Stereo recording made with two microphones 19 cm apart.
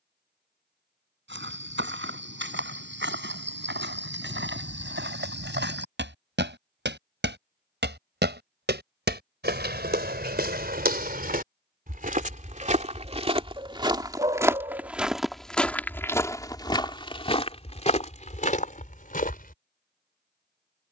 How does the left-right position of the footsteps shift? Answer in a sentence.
In this clip you hear the footsteps travel towards the left.